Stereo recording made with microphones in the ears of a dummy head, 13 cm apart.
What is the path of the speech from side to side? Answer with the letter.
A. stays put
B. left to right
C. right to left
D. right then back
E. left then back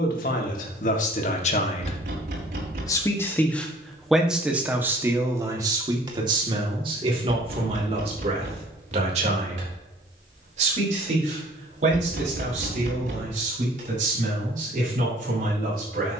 B.